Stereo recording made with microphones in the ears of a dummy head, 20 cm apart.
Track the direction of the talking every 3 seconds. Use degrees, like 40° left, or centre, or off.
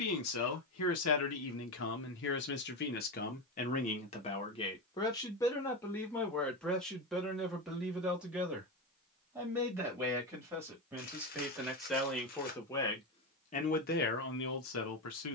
60° left, 30° left, centre, 10° right, 40° left.